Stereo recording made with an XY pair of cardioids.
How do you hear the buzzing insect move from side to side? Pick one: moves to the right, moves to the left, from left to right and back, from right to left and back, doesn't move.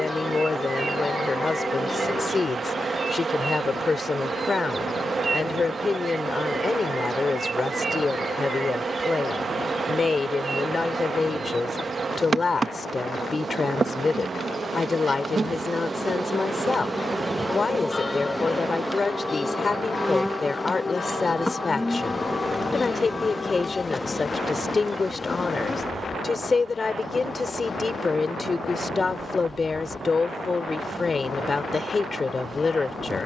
moves to the left.